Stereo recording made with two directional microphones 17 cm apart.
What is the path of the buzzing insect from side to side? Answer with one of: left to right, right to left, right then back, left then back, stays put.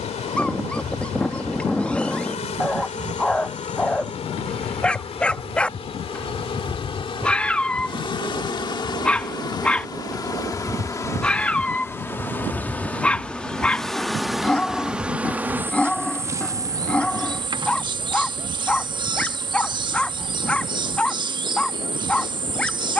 left to right.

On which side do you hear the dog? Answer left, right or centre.
centre.